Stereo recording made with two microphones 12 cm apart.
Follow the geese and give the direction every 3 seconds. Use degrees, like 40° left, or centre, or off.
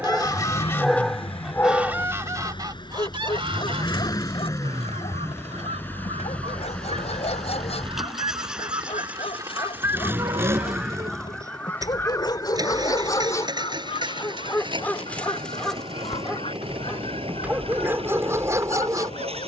centre, 50° right, 50° right, 10° right, 40° left, 50° left, 50° left.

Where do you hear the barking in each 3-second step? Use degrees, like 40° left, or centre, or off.
10° left, 50° left, 50° left, 40° left, 30° left, centre, 20° right.